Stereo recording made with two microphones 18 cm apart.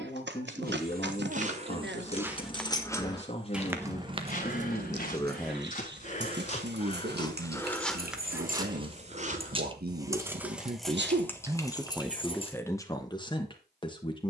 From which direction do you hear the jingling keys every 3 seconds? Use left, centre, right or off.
left, right, right, centre, left.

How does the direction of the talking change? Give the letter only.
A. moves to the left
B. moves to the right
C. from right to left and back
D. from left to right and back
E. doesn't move
D.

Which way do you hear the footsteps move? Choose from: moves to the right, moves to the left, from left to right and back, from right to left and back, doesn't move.
from right to left and back.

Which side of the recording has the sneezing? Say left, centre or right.
right.